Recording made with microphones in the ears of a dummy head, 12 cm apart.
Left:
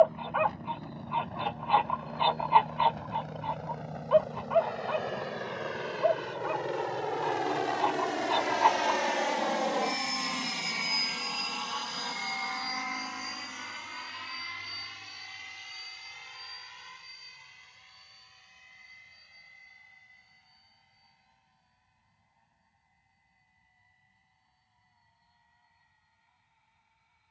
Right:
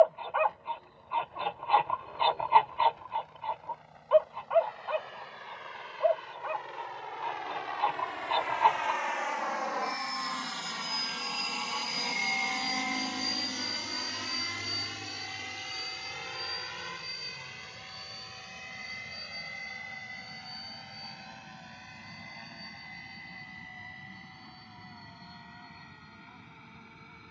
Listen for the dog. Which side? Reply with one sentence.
In this clip you hear the dog in the centre.